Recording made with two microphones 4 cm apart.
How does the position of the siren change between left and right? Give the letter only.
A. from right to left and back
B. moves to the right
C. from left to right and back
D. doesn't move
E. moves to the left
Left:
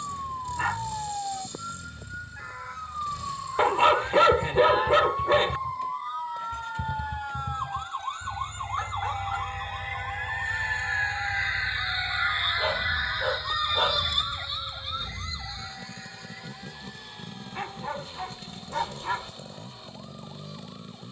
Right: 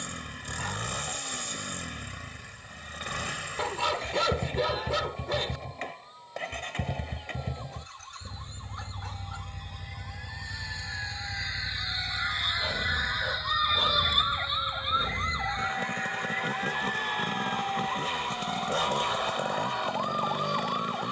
B.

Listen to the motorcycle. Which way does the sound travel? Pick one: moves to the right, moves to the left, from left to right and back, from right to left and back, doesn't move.
doesn't move.